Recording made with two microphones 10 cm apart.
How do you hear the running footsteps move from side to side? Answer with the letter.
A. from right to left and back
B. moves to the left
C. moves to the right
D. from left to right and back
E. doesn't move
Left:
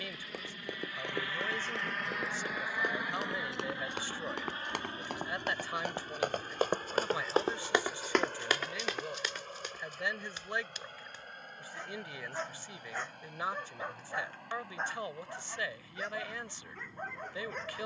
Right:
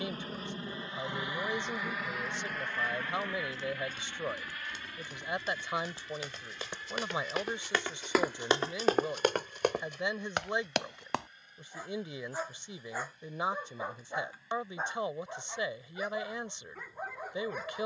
C.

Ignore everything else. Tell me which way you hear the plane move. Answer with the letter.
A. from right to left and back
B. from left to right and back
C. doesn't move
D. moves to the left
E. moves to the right
D.